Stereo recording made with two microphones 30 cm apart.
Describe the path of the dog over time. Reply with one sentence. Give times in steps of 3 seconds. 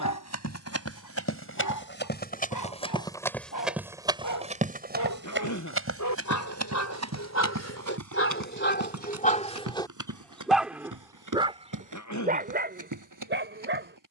In this clip you hear the dog on the left from 0 s, in the centre from 9 s and on the right from 12 s.